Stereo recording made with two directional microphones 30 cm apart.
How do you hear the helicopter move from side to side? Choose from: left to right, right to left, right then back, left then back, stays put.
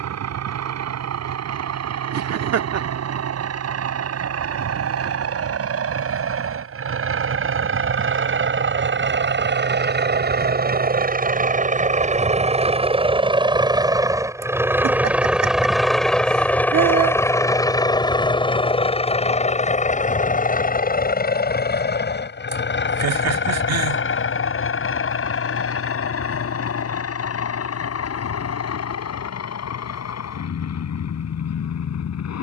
right to left.